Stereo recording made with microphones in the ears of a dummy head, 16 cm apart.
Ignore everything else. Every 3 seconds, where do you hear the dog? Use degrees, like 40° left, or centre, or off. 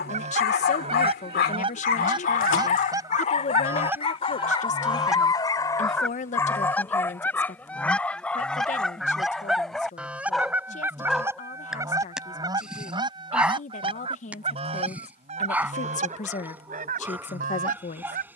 50° left, 30° left, 10° left, centre, 10° right, 10° right.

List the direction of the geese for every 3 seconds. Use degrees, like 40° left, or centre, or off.
30° right, 10° right, 10° left, 10° right, 30° right, 40° right.